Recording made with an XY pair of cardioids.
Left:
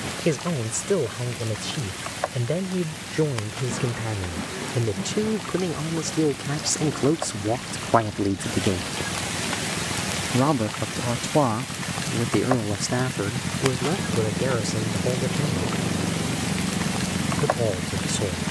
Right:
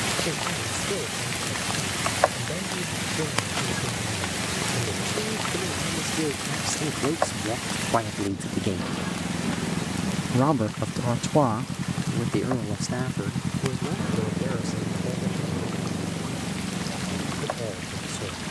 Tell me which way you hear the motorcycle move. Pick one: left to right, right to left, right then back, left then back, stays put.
right to left.